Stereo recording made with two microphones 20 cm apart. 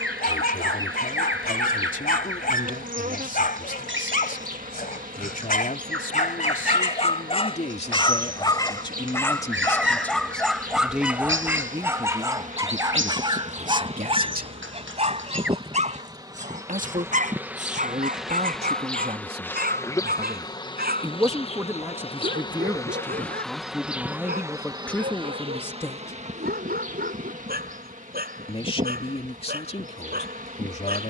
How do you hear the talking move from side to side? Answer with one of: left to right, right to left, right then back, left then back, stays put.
right then back.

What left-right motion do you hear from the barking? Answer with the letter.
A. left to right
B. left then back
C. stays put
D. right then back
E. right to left
A.